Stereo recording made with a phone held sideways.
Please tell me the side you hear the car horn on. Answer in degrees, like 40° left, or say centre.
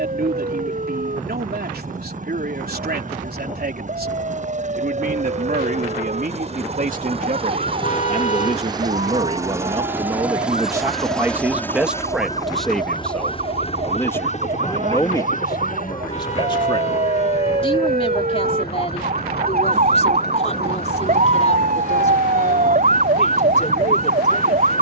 40° left.